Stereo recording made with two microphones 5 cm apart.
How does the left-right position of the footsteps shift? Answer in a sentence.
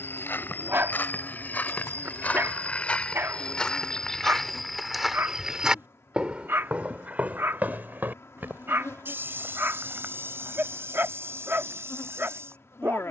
You can hear the footsteps move from left to right.